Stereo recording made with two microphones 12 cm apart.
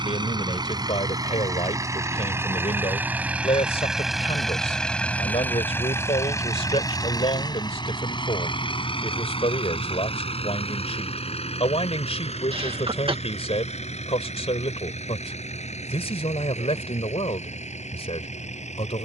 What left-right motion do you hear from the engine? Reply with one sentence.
In this clip you hear the engine go from the right side to the left.